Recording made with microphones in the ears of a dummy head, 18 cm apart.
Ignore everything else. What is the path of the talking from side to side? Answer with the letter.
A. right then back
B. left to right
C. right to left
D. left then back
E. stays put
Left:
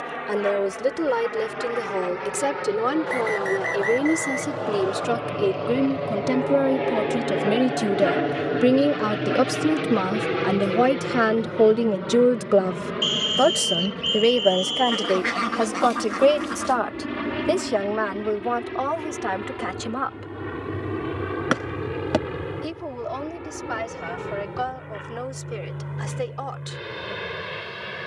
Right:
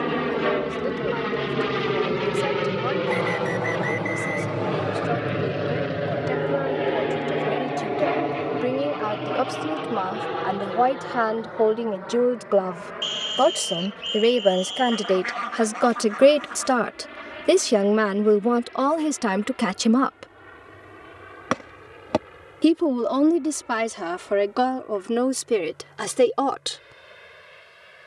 B.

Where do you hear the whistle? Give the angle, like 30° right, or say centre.
10° left.